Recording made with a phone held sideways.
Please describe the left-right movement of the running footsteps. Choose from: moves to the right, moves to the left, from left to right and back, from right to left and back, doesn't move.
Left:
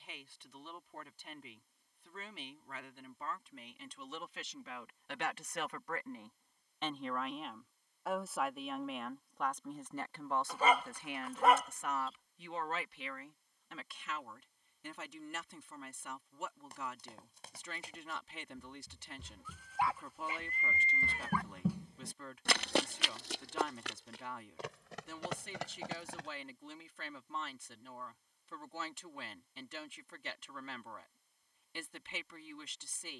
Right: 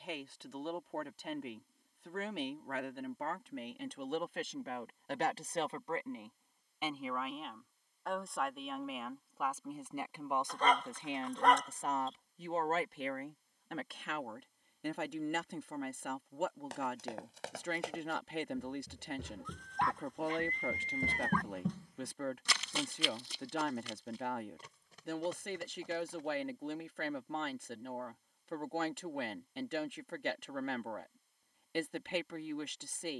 moves to the left.